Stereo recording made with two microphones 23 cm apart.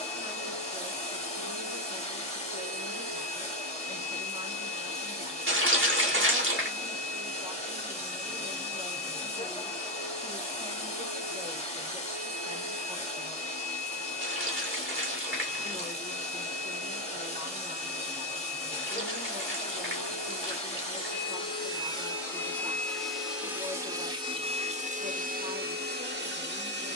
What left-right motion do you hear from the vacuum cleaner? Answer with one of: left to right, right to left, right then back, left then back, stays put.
left to right.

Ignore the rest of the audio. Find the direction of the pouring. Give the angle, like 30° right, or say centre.
50° right.